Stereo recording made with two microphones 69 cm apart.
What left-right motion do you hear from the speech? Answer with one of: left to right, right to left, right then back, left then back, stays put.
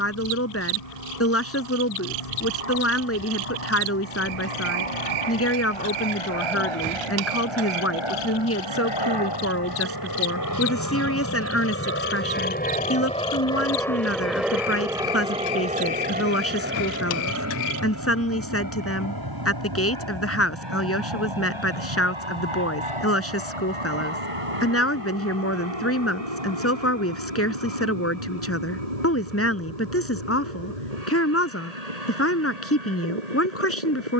stays put.